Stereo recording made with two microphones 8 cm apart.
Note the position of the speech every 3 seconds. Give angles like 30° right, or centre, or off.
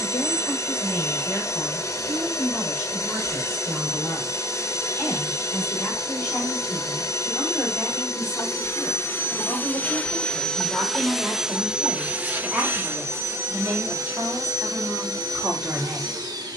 30° left, 20° left, 10° left, centre, 20° right, 20° right.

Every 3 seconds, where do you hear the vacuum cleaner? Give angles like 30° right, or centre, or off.
40° left, 40° left, 40° left, 10° left, 40° right, 50° right.